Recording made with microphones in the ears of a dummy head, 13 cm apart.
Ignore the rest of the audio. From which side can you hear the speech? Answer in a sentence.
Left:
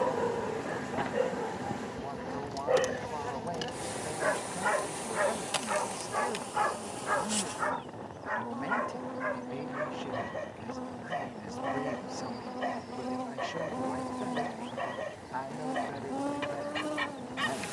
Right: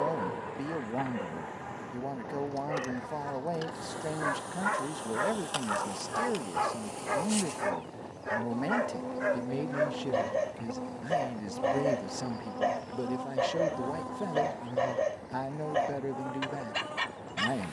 In this clip you hear the speech on the right.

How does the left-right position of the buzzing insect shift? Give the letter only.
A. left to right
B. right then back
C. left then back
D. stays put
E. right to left
B.